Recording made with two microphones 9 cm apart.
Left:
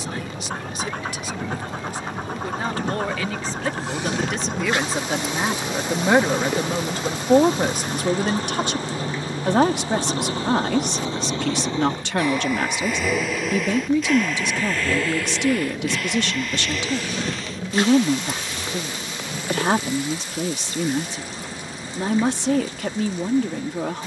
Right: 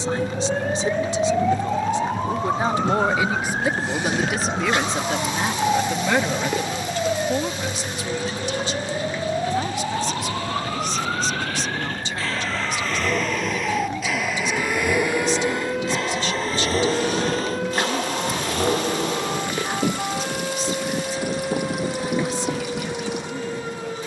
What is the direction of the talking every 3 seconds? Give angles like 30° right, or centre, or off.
30° right, centre, 40° left, 70° left, 70° left, 70° left, 70° left, 70° left.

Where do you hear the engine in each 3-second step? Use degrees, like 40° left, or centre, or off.
60° left, 50° left, 50° left, 30° left, centre, 30° right, 60° right, 70° right.